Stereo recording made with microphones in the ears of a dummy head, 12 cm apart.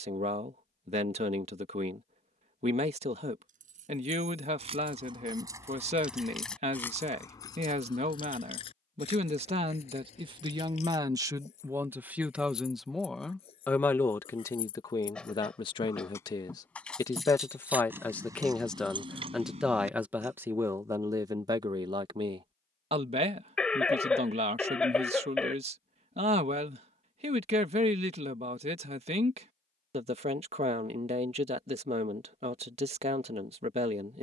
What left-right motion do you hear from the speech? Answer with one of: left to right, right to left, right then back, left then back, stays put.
left then back.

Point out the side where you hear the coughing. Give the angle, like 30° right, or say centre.
10° left.